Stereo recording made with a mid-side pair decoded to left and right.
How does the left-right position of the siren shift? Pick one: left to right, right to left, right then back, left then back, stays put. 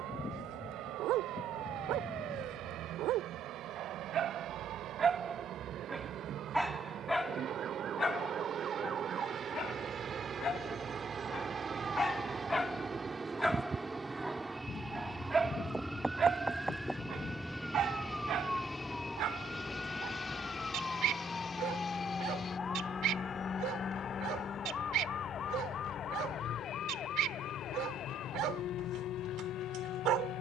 right to left.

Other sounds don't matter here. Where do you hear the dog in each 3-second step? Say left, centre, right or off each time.
right, right, centre, left, centre, right, right, right, right, right.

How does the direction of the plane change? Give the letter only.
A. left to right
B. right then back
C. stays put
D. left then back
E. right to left
E.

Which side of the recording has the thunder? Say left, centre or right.
left.